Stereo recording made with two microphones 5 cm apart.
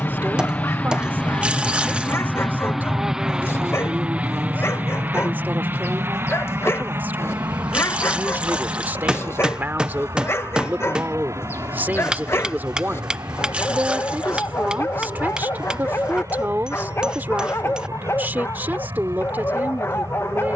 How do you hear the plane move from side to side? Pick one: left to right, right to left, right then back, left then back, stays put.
left to right.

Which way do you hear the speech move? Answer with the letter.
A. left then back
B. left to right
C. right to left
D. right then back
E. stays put
E.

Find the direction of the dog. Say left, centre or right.
left.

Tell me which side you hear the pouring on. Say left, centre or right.
right.